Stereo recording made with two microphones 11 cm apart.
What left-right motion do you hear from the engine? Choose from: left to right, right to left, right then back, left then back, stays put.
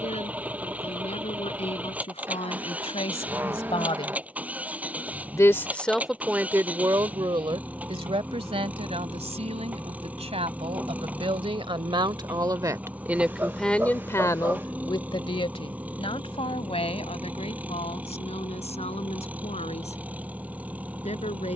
stays put.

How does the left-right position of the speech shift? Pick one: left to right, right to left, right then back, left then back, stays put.
right then back.